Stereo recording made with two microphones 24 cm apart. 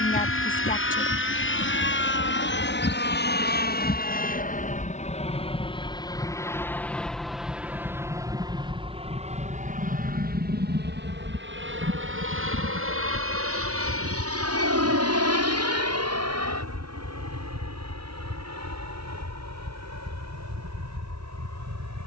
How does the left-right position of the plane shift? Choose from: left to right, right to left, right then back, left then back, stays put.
left to right.